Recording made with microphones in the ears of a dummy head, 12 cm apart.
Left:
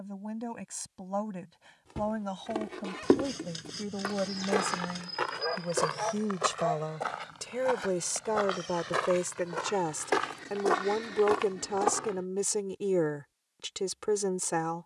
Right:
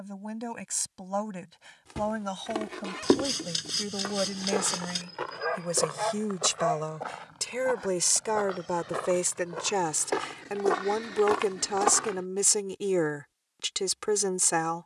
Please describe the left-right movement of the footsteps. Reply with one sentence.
In this clip you hear the footsteps move from right to left and back again.